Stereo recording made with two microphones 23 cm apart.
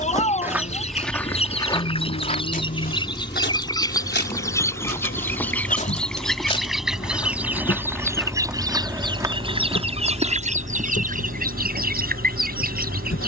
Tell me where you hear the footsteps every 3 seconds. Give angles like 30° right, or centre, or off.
10° left, 40° left, 10° left, 20° right, off.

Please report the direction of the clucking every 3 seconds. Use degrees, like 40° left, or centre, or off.
30° left, 10° left, 10° right, 30° right, 40° right.